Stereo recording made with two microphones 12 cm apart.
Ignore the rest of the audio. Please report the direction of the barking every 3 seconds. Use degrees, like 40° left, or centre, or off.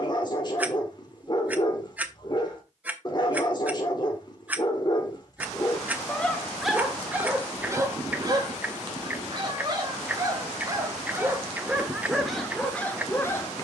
40° left, 30° left, 10° right, 30° right, 10° left.